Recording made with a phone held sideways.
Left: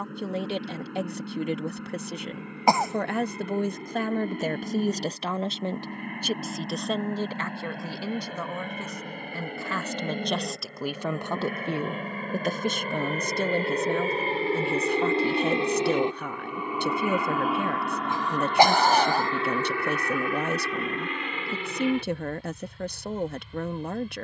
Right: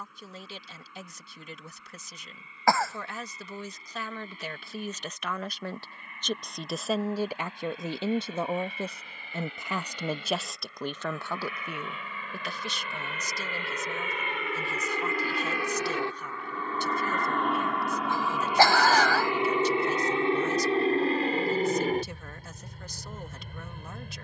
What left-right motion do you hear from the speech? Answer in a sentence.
You can hear the speech go right and come back.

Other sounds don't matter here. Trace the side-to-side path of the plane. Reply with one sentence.
You can hear the plane move from left to right.